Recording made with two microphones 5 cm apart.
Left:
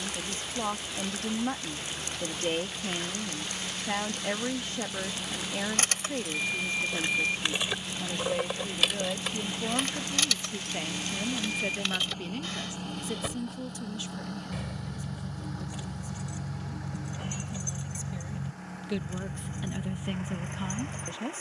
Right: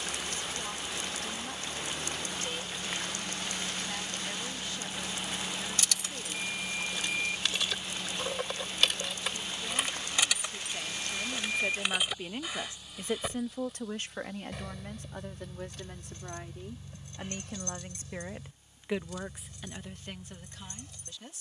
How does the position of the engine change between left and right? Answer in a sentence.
In this clip you hear the engine move from right to left.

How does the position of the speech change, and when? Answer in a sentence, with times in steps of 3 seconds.
In this clip you hear the speech on the left from 0 s, on the right from 12 s and in the centre from 18 s.